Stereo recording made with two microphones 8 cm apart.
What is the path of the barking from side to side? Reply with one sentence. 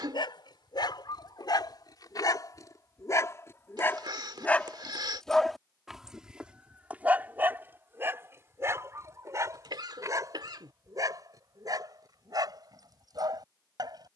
You can hear the barking move from left to right.